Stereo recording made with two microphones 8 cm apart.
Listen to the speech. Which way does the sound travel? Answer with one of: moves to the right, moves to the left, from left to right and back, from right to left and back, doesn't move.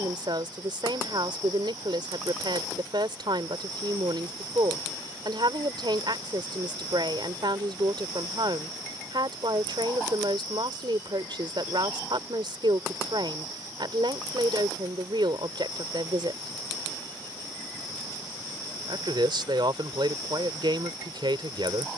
doesn't move.